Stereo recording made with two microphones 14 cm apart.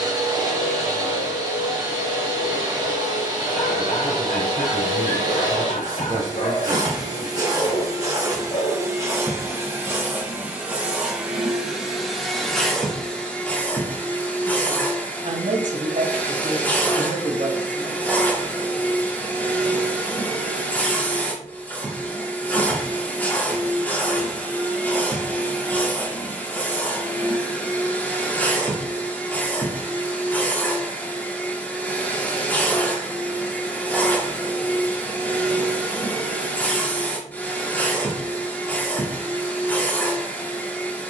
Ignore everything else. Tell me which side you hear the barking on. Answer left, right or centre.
left.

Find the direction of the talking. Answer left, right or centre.
right.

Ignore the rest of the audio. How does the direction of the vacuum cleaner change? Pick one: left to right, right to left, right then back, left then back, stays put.
right to left.